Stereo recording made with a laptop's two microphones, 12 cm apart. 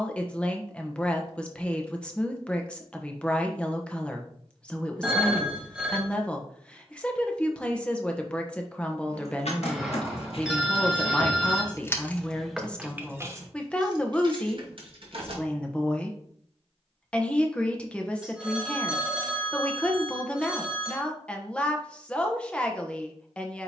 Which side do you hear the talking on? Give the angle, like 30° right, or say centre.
10° left.